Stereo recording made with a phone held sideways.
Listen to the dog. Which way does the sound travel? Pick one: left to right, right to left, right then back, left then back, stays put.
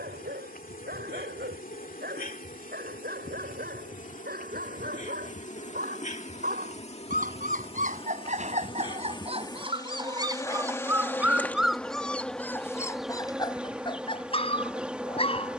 right to left.